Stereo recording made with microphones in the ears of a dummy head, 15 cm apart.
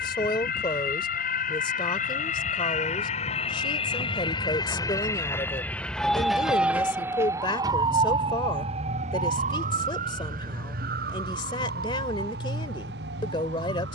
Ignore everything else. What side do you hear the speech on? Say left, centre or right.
left.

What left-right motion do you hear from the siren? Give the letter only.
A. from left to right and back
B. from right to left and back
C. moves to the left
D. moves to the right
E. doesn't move
D.